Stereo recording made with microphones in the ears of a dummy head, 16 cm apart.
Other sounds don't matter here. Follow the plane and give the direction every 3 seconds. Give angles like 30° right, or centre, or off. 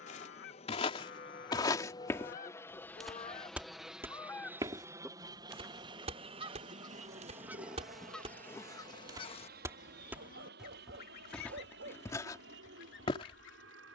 30° left, 10° right, 40° right, 50° right, 60° right.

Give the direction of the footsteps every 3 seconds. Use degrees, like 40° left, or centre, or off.
20° left, 20° right, 30° right, centre, 20° left.